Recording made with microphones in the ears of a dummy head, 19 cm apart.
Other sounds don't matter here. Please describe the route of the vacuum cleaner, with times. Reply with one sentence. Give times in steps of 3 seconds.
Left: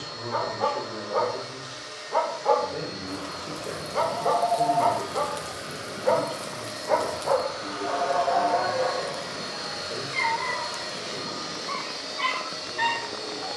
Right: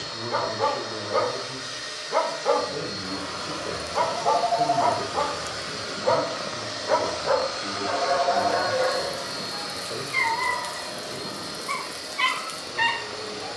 In this clip you hear the vacuum cleaner on the right from 0 s and on the left from 9 s.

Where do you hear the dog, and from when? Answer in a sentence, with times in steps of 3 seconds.
In this clip you hear the dog on the right from 0 s, on the left from 3 s and on the right from 6 s.